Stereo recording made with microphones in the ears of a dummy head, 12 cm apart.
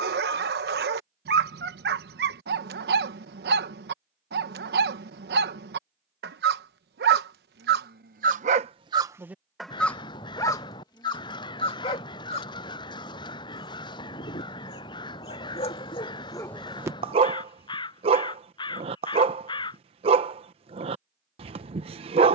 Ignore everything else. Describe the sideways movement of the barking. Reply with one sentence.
You can hear the barking go left and come back.